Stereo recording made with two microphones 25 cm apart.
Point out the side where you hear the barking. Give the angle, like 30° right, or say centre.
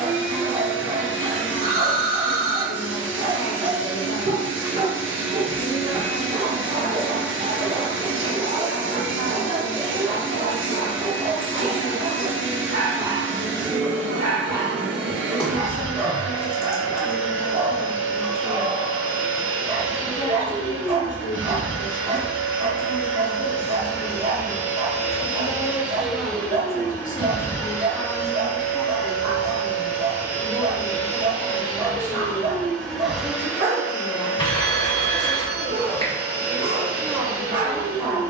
50° right.